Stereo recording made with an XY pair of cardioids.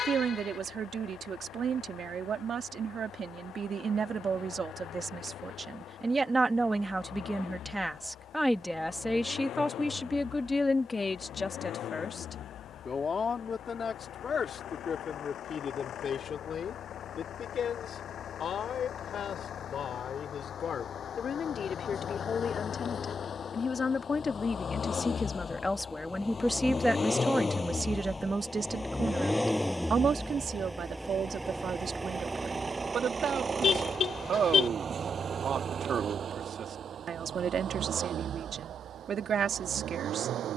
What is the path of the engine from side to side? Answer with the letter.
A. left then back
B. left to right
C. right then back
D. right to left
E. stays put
B.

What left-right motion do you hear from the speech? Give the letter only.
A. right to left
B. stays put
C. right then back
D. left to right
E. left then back
E.